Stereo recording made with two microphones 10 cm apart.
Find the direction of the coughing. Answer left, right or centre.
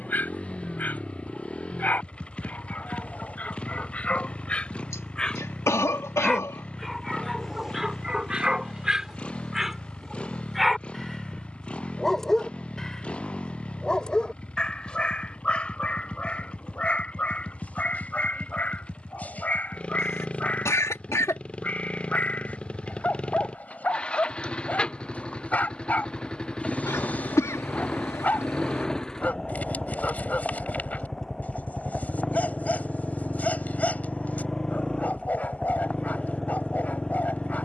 left.